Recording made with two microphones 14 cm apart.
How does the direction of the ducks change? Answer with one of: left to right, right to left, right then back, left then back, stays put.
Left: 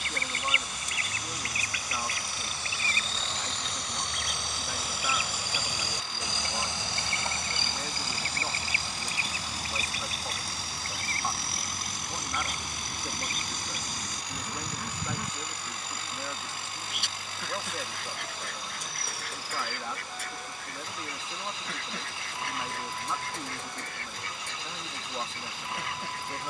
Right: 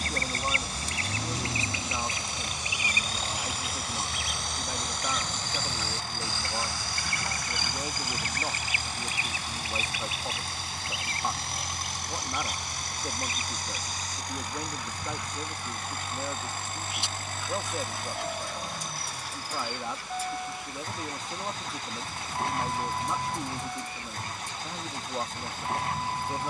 right to left.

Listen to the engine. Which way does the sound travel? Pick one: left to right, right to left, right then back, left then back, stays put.
stays put.